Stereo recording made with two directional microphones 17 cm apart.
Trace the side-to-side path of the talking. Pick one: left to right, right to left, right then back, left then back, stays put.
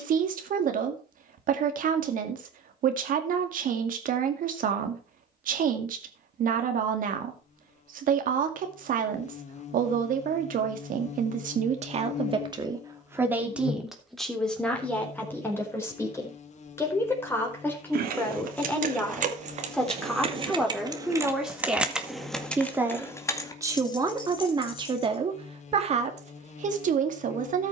left then back.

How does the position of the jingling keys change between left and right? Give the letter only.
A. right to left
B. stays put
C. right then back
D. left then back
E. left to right
A.